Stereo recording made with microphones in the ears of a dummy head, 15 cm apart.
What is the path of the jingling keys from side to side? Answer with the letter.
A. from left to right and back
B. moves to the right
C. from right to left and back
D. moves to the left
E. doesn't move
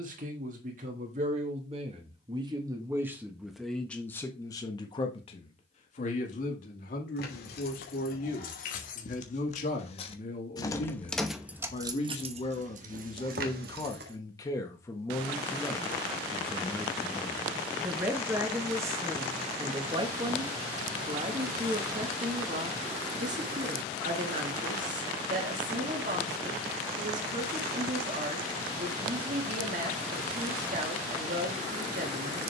B.